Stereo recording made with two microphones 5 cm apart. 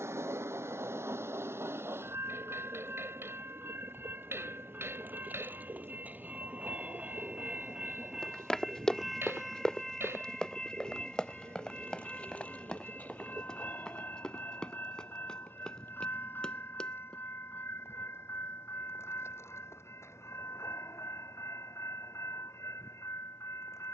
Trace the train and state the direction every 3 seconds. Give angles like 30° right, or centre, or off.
60° right, 40° right, 20° right, 10° left, 30° left, 50° left, 60° left, 60° left.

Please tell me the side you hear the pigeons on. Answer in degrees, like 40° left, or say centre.
60° right.